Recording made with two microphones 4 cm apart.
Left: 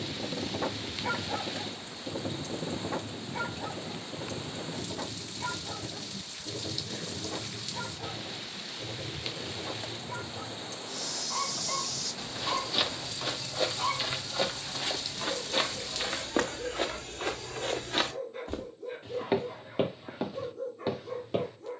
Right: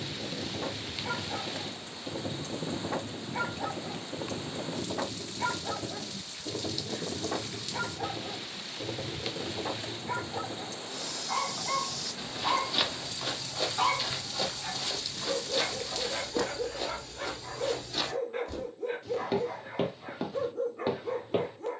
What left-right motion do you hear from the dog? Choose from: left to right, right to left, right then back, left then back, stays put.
left to right.